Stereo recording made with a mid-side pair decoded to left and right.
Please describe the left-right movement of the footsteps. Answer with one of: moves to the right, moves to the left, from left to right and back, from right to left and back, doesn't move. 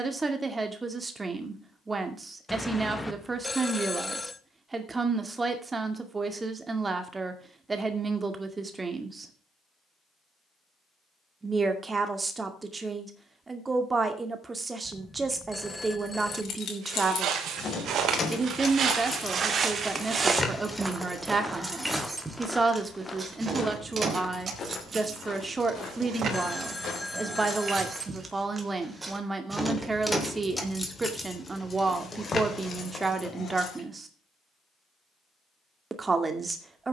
moves to the left.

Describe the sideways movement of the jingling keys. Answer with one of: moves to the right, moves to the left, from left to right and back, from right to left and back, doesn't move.
from left to right and back.